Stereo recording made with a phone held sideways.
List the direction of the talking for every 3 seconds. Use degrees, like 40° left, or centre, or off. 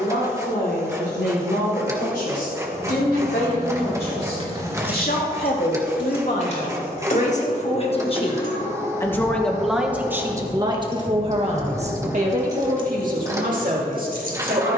80° left, 70° left, 50° left, 20° right, 60° right.